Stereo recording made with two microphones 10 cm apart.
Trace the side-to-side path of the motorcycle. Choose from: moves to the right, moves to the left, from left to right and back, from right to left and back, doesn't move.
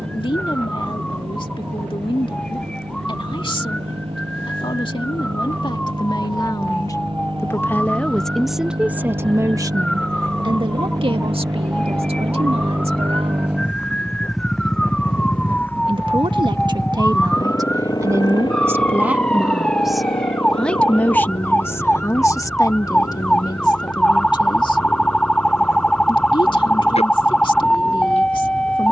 moves to the left.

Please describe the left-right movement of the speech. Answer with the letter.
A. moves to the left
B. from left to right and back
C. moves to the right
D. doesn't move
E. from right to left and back
B.